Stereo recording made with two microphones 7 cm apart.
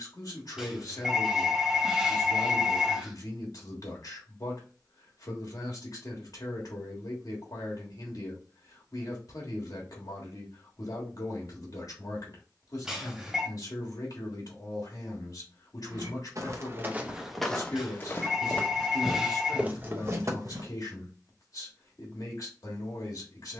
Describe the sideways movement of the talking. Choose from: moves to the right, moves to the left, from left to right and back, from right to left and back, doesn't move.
doesn't move.